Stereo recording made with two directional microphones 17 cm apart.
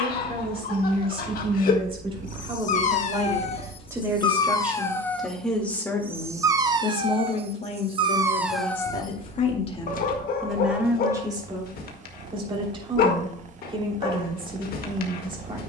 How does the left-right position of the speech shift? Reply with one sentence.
You can hear the speech move from right to left and back again.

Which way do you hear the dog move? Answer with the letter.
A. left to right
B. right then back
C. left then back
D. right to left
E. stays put
B.